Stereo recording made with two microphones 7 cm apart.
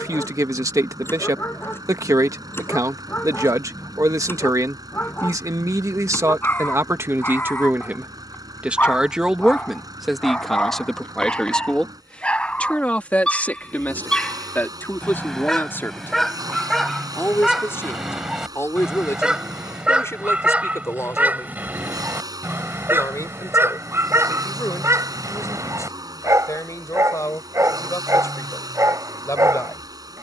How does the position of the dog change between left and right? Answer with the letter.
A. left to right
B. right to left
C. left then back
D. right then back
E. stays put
A.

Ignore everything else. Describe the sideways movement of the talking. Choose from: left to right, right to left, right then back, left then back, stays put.
right to left.